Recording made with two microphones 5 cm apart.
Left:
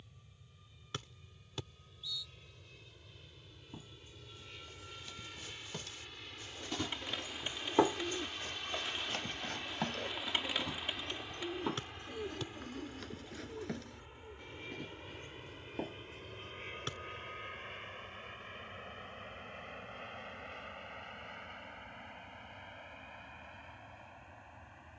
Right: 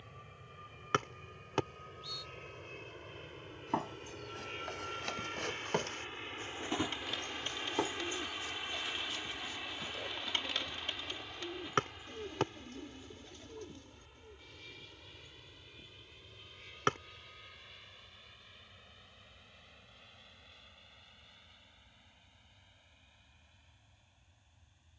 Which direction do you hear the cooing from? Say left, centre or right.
centre.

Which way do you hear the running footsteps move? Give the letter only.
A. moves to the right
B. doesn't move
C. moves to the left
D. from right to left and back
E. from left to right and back
C.